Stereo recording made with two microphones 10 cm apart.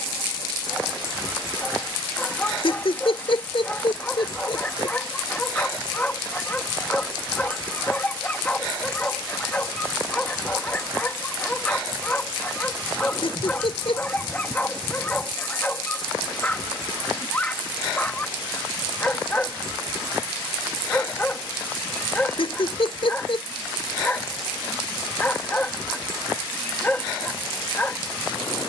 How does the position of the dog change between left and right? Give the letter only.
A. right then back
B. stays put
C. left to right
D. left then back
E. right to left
B.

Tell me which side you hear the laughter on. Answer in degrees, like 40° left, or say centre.
70° left.